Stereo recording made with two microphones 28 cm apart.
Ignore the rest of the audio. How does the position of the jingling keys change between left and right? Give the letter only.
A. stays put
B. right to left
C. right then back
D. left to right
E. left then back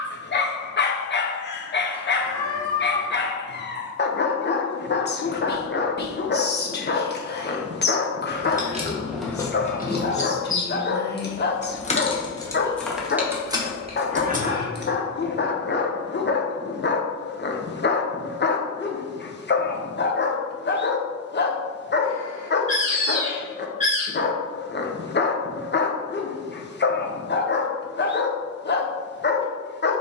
E.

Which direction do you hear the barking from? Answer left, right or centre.
left.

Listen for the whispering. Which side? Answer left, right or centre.
left.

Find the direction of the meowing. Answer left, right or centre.
left.